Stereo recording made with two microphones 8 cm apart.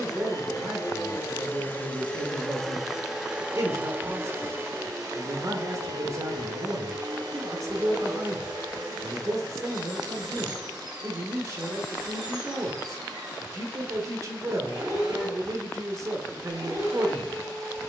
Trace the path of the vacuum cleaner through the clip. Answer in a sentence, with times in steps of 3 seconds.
You can hear the vacuum cleaner on the left from 0 s and on the right from 3 s.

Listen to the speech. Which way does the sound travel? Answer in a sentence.
In this clip you hear the speech stay in one place.